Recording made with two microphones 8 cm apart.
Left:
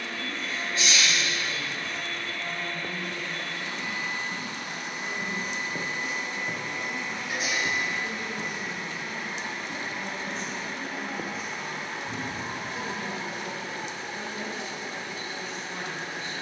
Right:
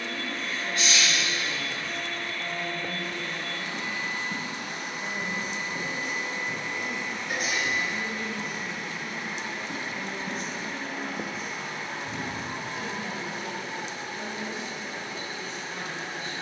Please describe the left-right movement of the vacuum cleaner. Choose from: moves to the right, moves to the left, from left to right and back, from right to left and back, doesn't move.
moves to the left.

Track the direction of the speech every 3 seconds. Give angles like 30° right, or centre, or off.
70° right, 70° right, 50° right, 10° right, 20° left, 30° left.